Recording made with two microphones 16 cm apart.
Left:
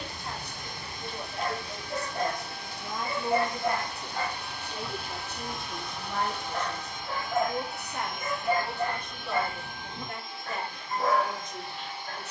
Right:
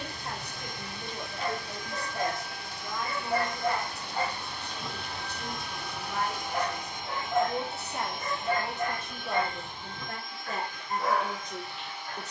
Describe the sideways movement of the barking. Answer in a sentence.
You can hear the barking move from left to right and back again.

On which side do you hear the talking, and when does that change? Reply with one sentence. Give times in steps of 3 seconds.
You can hear the talking on the right from 0 s, on the left from 3 s, in the centre from 6 s and on the right from 9 s.